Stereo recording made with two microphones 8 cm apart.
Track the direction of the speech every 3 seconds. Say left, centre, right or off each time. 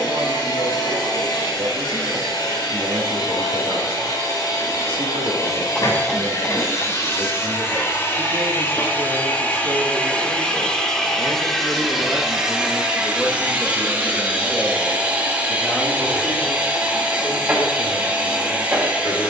right, right, right, right, centre, left, left.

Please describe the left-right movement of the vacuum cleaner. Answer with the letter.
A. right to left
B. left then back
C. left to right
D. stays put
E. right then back
C.